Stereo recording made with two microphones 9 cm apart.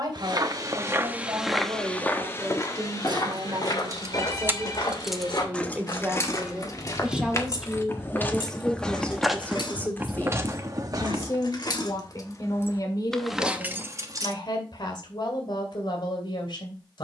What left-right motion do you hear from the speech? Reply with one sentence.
In this clip you hear the speech travel towards the left.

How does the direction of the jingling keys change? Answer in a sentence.
You can hear the jingling keys go left and come back.